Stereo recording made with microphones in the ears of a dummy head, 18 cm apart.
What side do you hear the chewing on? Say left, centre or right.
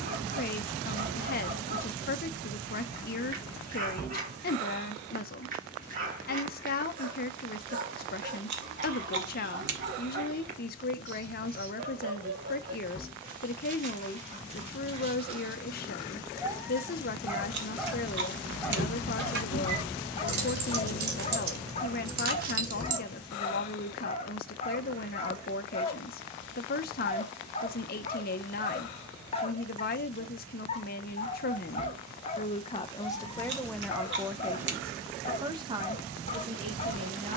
right.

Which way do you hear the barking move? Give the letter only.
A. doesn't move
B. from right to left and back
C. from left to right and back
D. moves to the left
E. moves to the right
D.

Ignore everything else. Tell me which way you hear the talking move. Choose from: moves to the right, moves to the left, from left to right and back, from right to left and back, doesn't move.
moves to the right.